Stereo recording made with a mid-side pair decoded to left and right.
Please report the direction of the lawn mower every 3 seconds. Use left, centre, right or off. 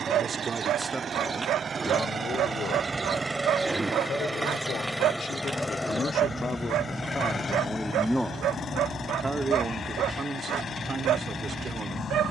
right, centre, left, left.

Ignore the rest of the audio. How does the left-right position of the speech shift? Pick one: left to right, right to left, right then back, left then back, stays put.
left then back.